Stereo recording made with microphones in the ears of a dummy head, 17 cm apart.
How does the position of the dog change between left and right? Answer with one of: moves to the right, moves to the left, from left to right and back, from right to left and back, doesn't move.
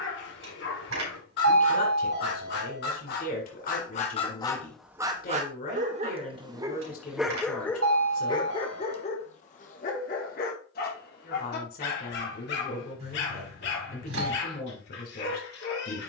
from left to right and back.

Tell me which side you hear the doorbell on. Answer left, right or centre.
right.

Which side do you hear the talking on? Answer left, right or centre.
left.